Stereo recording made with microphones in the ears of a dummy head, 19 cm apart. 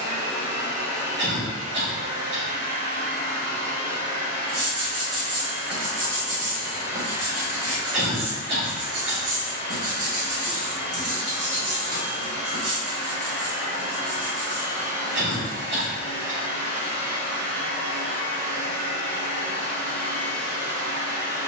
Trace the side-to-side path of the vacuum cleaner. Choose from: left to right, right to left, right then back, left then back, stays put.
stays put.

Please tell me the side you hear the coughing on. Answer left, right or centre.
right.